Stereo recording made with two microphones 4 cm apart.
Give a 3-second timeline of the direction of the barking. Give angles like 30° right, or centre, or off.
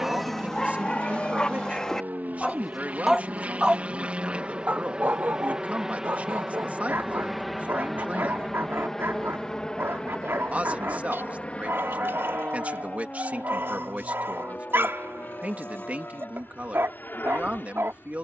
10° left, 30° right, 60° right, 60° right, 60° right, 60° right.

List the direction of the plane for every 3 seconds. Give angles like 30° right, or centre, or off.
50° right, 20° right, centre, 20° left, 30° left, 40° left.